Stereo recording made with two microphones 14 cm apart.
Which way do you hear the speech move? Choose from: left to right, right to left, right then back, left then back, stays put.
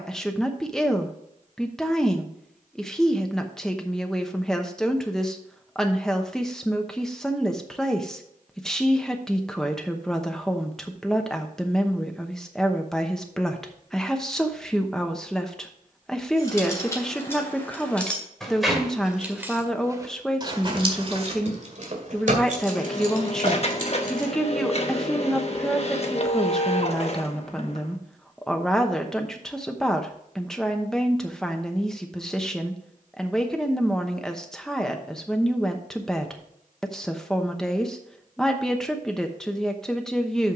stays put.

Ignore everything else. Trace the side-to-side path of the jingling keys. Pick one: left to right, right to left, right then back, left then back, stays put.
left to right.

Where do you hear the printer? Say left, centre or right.
left.